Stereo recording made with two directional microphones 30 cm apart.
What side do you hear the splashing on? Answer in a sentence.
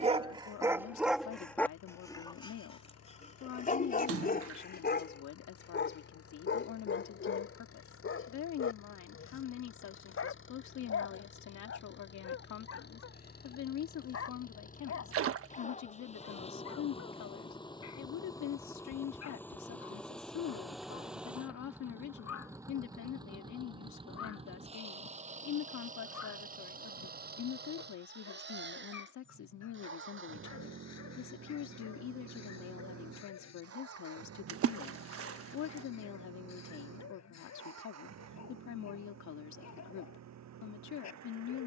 You can hear the splashing on the right.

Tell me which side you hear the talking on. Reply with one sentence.
You can hear the talking on the left.